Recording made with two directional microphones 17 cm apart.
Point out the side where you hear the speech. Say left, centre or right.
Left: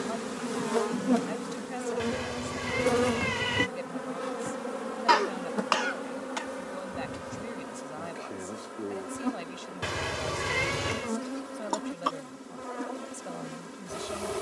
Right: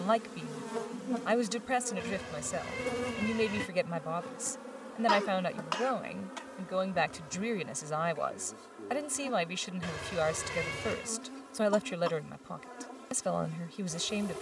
right.